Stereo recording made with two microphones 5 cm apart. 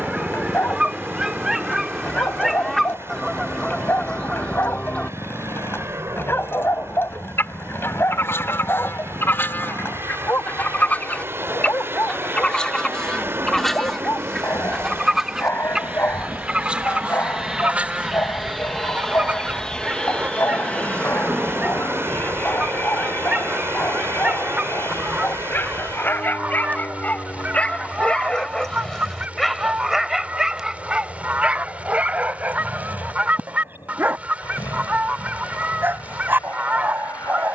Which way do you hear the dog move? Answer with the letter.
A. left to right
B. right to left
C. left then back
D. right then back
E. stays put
A.